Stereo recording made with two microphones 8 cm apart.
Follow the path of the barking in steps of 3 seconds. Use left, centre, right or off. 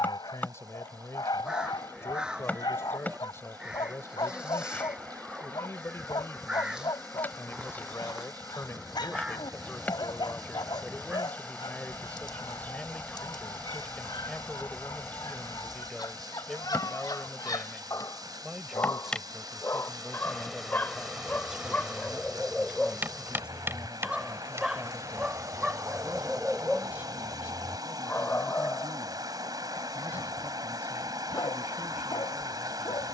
left, left, left, left, left, left, left, centre, centre, left, left.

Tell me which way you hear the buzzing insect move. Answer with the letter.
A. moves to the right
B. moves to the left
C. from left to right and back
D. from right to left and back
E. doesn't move
A.